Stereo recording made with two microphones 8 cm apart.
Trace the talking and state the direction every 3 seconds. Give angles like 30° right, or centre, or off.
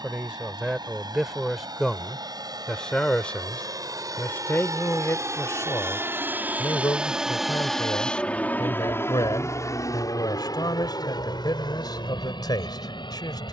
centre, 30° left, 50° left, 60° left, 60° left.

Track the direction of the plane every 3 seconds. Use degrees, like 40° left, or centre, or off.
70° right, 50° right, centre, 50° left, 60° left.